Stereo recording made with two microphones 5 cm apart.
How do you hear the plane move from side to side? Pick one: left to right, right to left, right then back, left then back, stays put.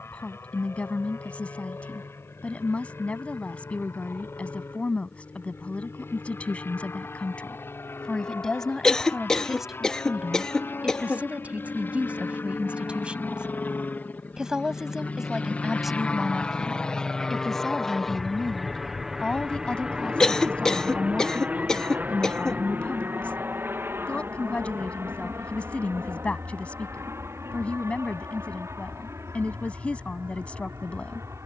left to right.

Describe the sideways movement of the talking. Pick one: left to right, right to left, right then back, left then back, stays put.
right then back.